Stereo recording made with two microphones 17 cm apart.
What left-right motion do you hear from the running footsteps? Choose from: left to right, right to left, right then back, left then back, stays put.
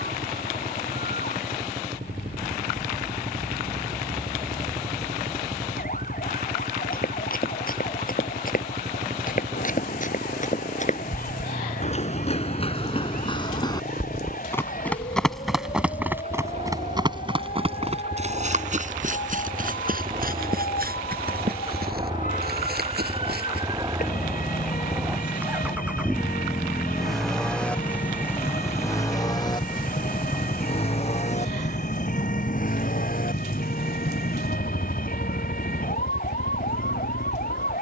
left to right.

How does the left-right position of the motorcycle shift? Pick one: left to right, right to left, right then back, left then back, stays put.
right to left.